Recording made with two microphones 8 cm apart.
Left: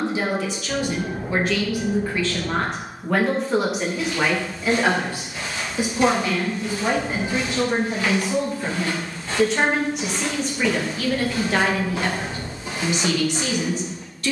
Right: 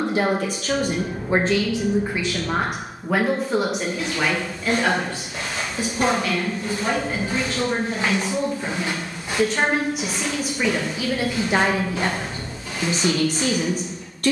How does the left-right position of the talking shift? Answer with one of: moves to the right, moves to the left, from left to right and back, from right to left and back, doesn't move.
from right to left and back.